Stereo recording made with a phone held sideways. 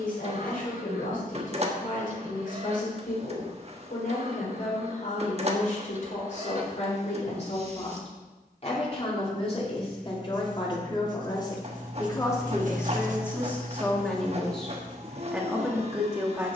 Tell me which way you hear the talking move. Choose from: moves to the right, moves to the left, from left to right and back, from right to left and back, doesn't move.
moves to the right.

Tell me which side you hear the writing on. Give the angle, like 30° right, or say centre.
60° right.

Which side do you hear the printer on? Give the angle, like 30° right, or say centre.
40° right.